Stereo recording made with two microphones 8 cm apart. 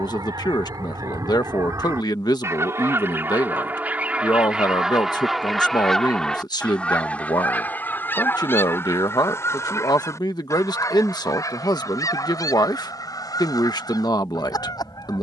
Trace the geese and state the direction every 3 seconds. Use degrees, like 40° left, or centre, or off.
40° right, 10° right, 20° left, 40° left, 50° left.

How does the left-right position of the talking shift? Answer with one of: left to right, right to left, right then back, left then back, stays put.
stays put.